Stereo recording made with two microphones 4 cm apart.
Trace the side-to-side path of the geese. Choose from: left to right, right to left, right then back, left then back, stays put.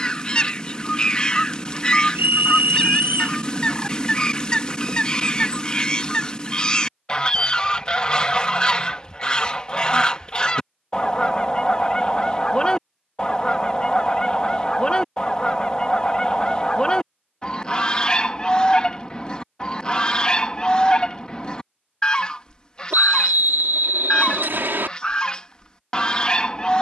stays put.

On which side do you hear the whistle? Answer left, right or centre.
right.